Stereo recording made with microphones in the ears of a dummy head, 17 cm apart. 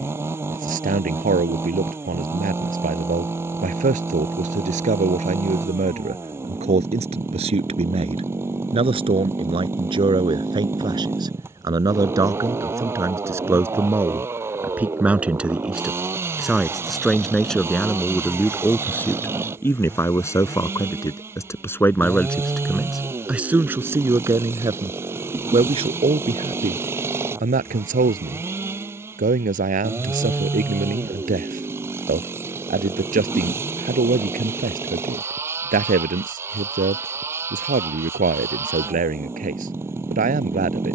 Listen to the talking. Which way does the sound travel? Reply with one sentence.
In this clip you hear the talking move from right to left and back again.